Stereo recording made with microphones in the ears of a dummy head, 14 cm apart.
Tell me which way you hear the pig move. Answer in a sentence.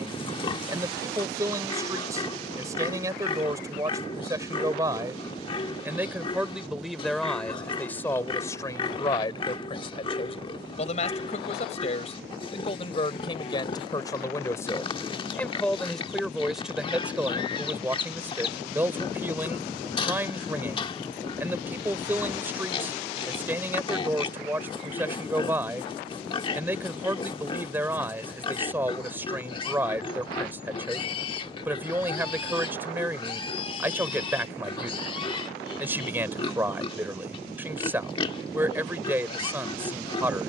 You can hear the pig stay put.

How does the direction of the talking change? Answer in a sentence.
You can hear the talking move from right to left and back again.